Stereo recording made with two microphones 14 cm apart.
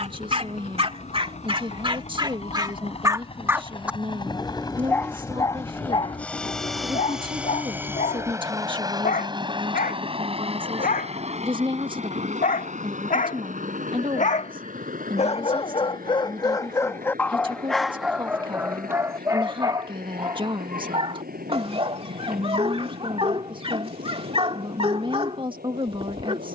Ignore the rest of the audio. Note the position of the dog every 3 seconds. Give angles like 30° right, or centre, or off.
40° right, 10° left, 60° left, 80° left, 70° left, 20° left, 20° right, 40° right, 40° right.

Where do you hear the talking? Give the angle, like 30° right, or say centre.
30° right.